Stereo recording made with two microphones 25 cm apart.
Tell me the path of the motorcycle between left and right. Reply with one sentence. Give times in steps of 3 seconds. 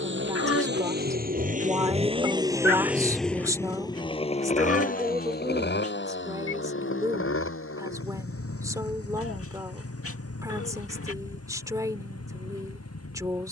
You can hear the motorcycle on the right from 0 s and on the left from 3 s.